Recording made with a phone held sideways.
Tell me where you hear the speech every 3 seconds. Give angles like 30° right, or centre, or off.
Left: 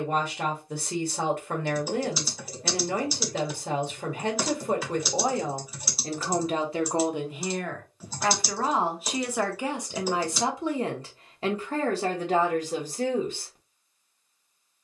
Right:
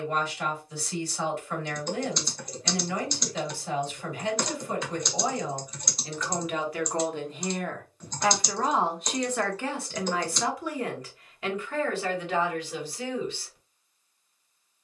60° left, 60° left, 20° left, 20° left, 40° left.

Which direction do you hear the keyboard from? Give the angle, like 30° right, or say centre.
10° left.